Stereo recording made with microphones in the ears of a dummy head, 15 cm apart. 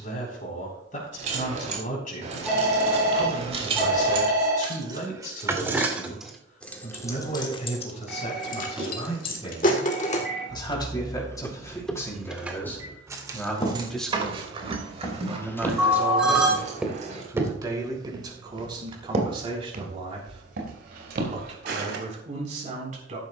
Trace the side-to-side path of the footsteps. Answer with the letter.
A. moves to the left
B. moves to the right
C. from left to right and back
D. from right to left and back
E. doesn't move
B.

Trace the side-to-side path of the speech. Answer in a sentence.
In this clip you hear the speech move to the right.